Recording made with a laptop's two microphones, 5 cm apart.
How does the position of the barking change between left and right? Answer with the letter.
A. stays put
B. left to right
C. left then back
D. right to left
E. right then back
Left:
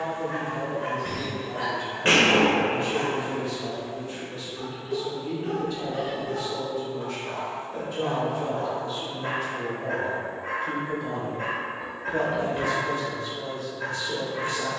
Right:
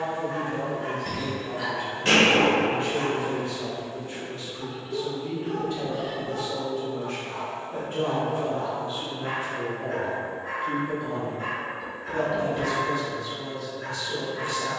A.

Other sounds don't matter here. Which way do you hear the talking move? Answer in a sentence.
In this clip you hear the talking move to the left.